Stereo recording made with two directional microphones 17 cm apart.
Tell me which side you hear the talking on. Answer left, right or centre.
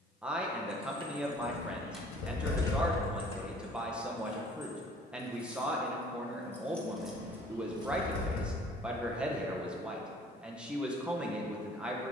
centre.